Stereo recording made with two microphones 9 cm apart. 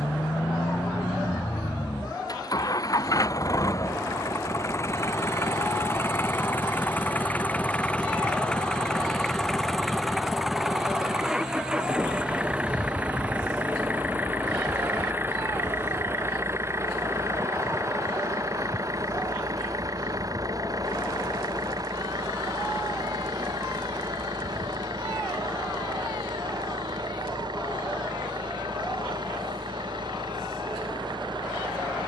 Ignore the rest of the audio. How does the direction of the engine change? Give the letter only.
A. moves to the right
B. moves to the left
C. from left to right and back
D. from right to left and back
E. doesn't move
A.